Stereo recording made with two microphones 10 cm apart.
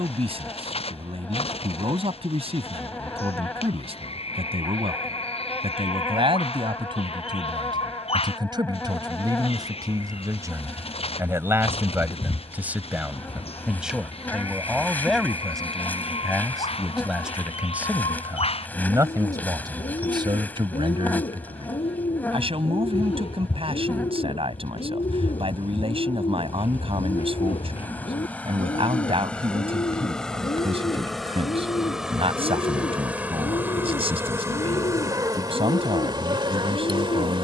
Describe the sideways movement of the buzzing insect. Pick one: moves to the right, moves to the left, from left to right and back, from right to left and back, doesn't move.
moves to the right.